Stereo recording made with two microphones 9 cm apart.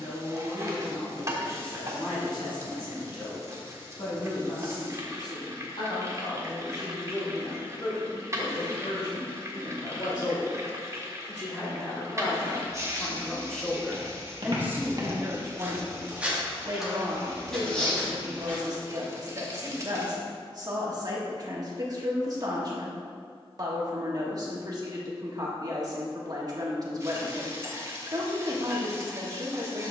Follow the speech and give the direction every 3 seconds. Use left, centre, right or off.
left, left, left, left, centre, right, right, right, right, right.